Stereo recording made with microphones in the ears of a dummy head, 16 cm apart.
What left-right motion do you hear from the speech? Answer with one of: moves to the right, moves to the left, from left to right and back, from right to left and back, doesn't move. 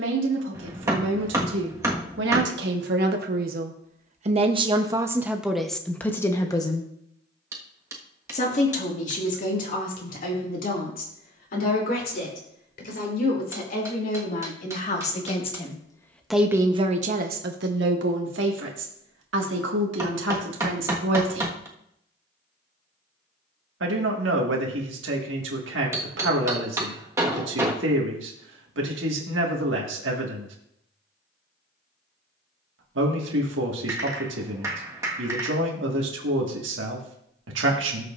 from right to left and back.